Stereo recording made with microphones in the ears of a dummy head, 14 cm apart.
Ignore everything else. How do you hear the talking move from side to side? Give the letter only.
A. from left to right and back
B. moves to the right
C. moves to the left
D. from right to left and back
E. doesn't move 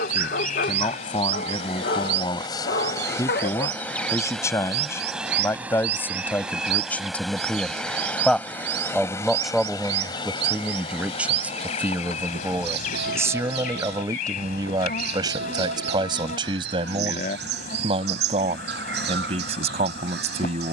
B.